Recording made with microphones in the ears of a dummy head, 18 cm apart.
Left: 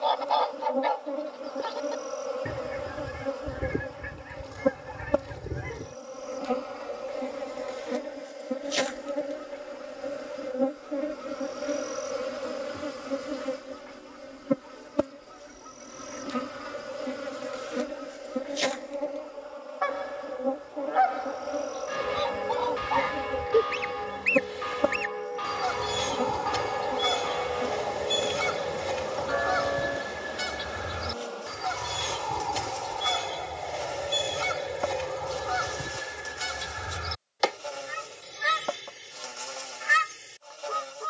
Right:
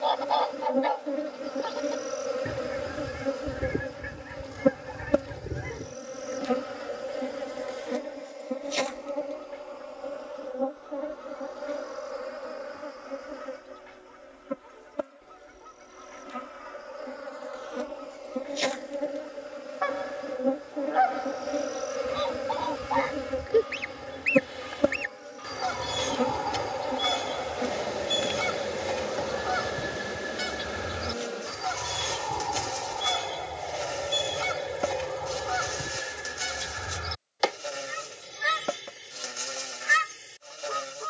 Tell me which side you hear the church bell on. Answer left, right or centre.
left.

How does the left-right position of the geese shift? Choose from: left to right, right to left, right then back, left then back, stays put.
stays put.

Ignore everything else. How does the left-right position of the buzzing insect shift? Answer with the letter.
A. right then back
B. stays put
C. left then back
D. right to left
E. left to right
C.